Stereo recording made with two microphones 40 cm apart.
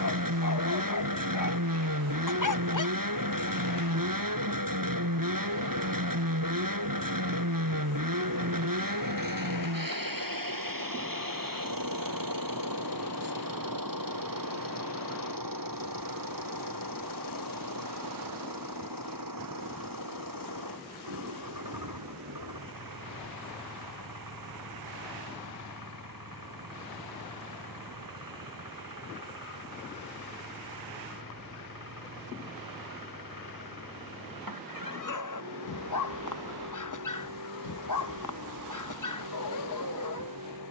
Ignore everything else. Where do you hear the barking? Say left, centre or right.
left.